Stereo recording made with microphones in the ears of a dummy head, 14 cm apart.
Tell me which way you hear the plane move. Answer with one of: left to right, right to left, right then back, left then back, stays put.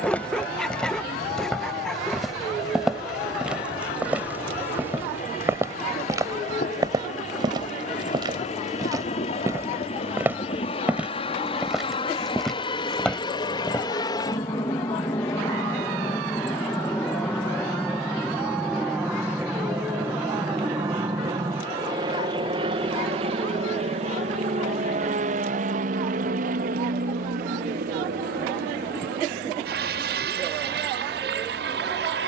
left to right.